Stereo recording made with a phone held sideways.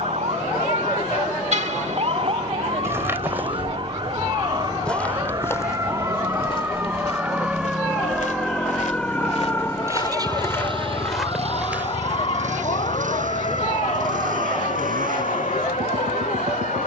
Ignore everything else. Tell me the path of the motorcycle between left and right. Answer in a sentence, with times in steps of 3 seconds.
You can hear the motorcycle on the left from 0 s and on the right from 9 s.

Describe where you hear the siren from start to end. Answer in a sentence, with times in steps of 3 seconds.
In this clip you hear the siren on the right from 0 s, in the centre from 6 s and on the left from 9 s.